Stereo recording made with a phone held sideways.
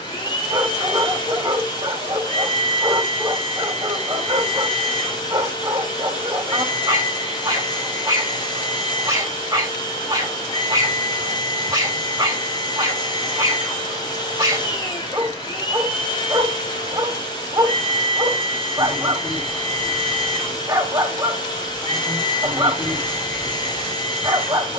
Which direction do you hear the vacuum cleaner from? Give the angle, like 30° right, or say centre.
30° left.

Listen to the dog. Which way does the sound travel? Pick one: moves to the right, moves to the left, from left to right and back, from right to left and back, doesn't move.
doesn't move.